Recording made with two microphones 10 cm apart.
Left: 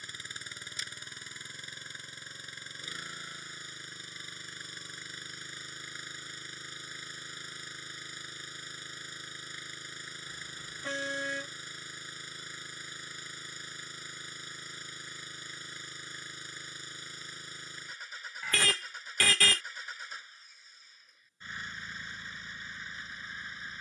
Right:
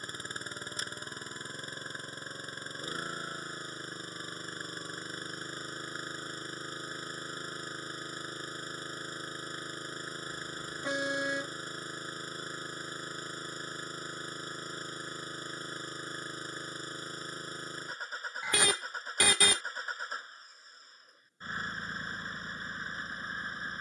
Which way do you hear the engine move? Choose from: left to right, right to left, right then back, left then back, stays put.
stays put.